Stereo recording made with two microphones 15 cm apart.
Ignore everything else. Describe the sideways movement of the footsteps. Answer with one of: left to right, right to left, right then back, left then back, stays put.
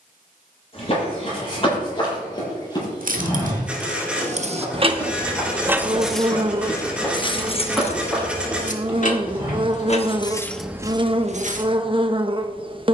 left to right.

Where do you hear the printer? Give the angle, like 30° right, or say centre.
10° right.